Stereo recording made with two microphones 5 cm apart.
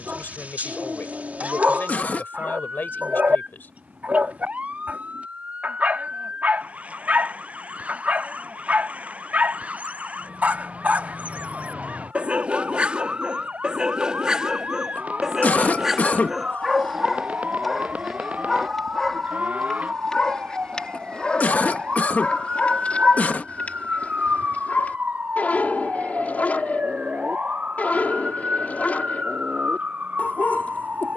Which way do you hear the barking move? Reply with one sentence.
In this clip you hear the barking go from the right side to the left.